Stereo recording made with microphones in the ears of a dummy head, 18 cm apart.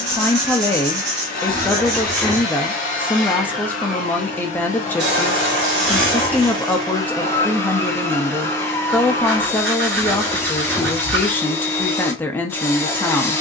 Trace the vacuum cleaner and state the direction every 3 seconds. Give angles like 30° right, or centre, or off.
40° left, 40° left, 20° left, 10° left, 10° left.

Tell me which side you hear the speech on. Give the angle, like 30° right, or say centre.
10° left.